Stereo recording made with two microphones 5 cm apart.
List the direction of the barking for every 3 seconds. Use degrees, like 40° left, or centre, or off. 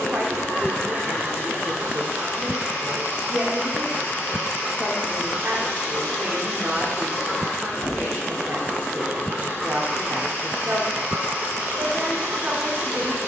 60° right, centre, centre, 30° right, 60° right.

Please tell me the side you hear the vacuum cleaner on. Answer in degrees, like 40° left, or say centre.
50° left.